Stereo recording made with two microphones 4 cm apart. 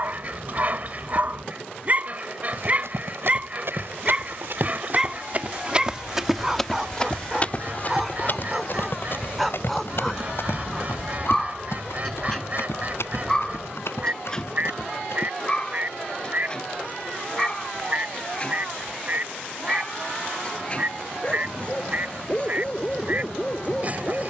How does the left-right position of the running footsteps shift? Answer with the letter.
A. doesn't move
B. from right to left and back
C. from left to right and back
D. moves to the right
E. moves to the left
E.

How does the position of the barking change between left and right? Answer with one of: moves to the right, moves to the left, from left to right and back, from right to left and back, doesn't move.
moves to the left.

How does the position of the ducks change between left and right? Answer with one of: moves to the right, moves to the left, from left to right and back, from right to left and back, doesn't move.
doesn't move.